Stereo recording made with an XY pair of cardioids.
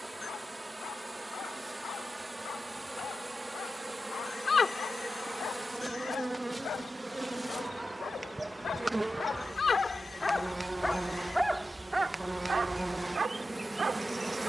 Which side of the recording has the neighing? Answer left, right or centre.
left.